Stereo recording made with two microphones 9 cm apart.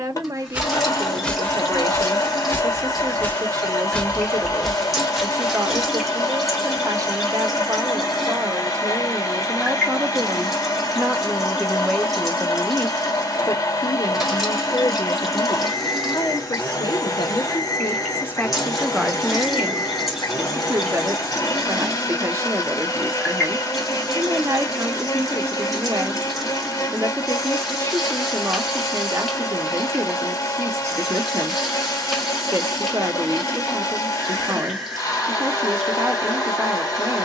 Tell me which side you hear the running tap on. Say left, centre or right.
centre.